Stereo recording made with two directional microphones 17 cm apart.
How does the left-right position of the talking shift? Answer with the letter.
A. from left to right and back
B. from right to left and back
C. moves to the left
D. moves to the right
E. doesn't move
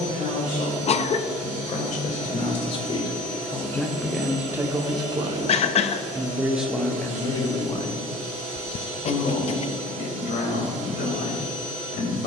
A.